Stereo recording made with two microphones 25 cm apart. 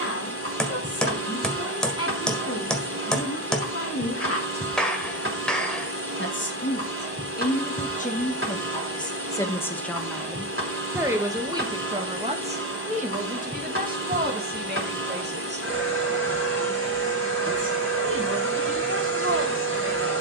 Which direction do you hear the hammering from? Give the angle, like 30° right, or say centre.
centre.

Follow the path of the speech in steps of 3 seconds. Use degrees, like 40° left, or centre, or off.
70° left, 70° left, 40° left, centre, 30° right, 50° right, 60° right.